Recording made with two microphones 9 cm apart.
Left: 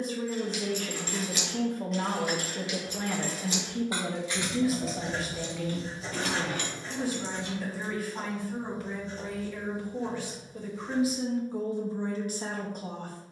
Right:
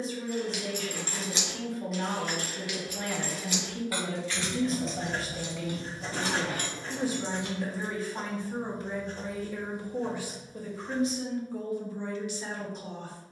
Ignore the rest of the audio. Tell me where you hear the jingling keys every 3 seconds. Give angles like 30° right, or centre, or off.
20° right, 10° left, 40° right, off, off.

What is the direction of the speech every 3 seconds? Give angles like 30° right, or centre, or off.
40° left, 10° left, 20° right, centre, 40° left.